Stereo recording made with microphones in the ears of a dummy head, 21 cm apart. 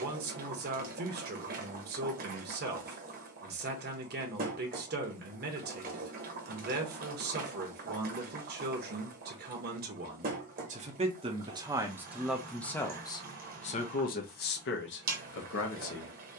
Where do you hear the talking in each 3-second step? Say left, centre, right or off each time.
right, right, right, right, left, left.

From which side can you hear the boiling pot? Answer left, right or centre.
right.